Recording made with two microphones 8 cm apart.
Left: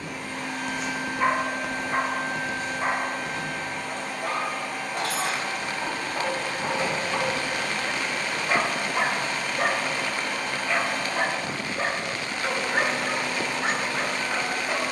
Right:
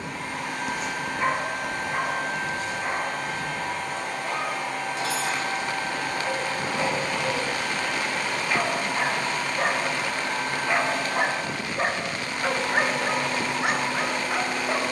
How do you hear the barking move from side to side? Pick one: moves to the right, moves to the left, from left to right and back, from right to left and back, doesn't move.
from right to left and back.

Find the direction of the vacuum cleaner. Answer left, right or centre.
right.